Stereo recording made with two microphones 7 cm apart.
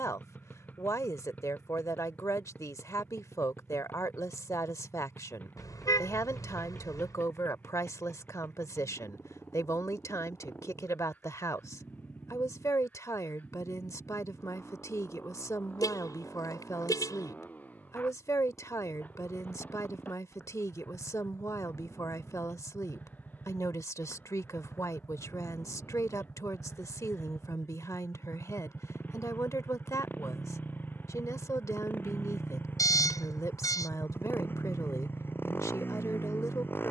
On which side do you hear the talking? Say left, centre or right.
left.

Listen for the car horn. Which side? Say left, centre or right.
left.